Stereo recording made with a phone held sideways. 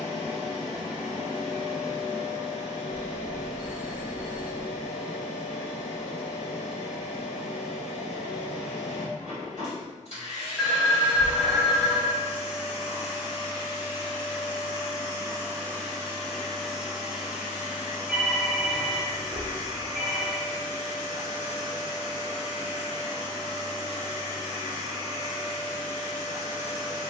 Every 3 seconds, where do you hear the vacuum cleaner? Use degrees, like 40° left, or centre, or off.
50° left, 50° left, 50° left, 50° left, 40° left, centre, 30° right, 30° right, 30° right.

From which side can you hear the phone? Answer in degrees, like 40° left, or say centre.
10° right.